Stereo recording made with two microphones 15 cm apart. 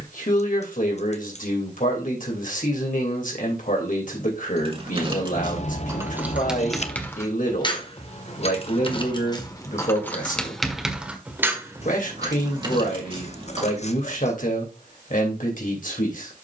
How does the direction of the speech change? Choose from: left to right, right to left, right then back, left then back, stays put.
stays put.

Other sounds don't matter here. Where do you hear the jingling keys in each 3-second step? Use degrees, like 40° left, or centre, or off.
off, 30° right, 20° left, 10° left, 30° right, off.